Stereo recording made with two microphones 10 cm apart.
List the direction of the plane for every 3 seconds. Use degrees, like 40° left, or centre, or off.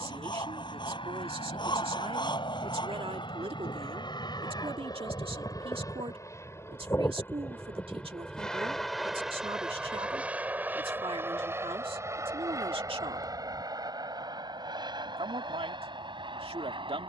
60° left, 50° left, 20° left, 10° right, 30° right, 40° right.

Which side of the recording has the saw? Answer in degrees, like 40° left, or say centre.
50° left.